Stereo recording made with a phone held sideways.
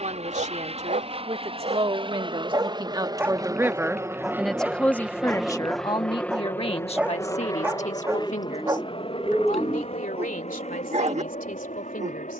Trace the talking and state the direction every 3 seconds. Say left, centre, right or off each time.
right, centre, left, left.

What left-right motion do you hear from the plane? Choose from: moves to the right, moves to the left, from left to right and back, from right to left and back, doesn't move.
moves to the left.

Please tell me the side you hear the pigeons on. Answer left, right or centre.
centre.